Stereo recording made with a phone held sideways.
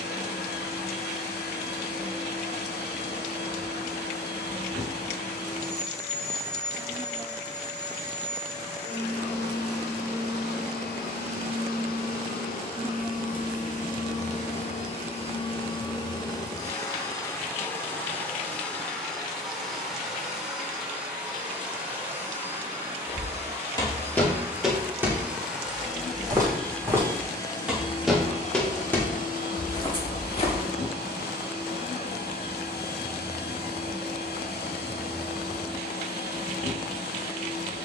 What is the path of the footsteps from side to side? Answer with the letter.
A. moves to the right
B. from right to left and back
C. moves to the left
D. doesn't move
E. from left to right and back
E.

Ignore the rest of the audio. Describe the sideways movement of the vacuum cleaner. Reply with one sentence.
In this clip you hear the vacuum cleaner move from left to right and back again.